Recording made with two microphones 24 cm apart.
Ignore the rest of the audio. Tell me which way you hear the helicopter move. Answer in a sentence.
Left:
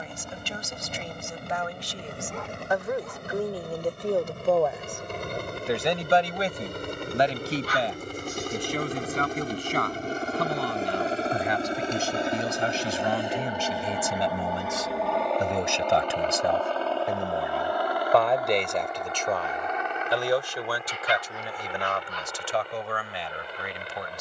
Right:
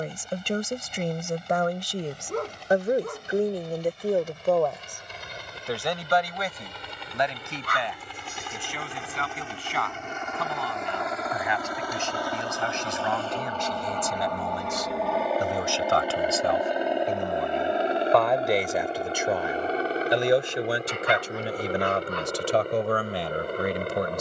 You can hear the helicopter move to the right.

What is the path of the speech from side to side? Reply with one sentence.
You can hear the speech move from right to left and back again.